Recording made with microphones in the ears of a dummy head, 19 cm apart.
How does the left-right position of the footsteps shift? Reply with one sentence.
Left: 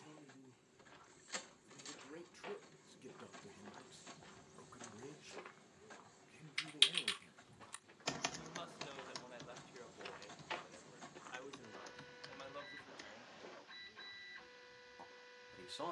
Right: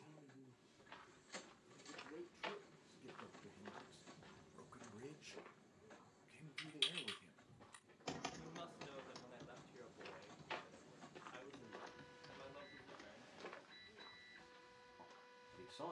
You can hear the footsteps go left and come back.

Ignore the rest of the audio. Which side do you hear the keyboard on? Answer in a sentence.
In this clip you hear the keyboard on the left.